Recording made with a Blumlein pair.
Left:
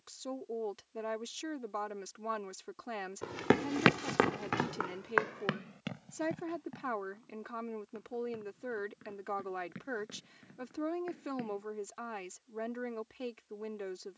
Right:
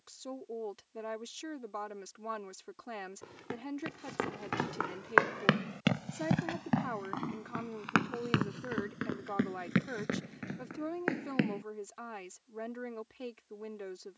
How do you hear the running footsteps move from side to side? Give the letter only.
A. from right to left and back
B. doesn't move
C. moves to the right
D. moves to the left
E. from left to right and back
C.